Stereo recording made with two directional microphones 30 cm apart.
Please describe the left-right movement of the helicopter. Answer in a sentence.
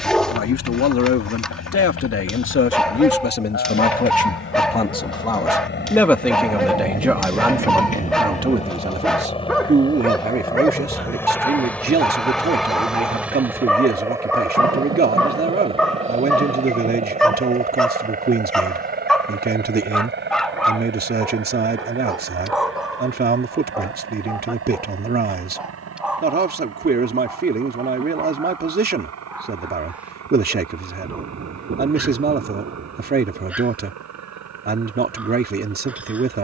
In this clip you hear the helicopter travel towards the right.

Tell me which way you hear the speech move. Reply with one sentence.
In this clip you hear the speech move to the right.